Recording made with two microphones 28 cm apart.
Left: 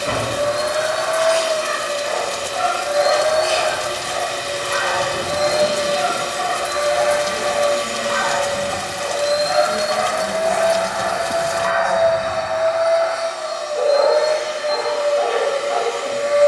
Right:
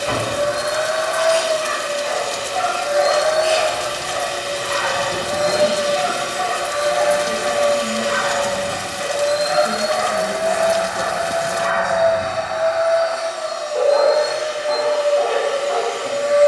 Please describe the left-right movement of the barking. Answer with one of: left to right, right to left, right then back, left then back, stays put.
left to right.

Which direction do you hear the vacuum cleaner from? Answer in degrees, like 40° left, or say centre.
40° right.